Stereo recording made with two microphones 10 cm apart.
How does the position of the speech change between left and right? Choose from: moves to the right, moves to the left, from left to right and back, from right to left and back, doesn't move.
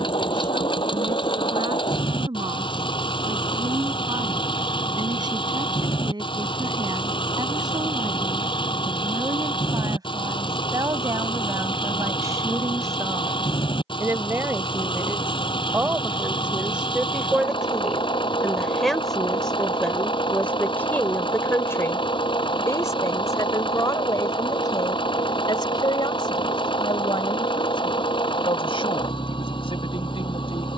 moves to the left.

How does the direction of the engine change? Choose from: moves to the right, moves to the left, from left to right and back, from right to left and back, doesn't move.
doesn't move.